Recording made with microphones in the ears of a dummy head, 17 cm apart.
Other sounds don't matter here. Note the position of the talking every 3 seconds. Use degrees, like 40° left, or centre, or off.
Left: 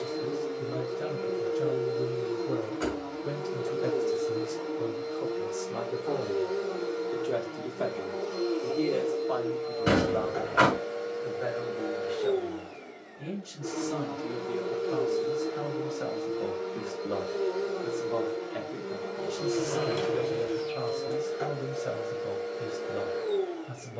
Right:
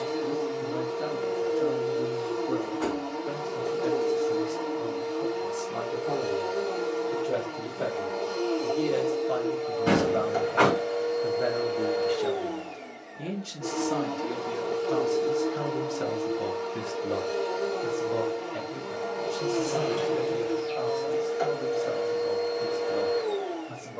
30° left, 20° left, centre, 30° right, 60° right, 40° right, 10° left, 30° left.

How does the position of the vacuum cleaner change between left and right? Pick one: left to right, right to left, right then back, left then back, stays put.
stays put.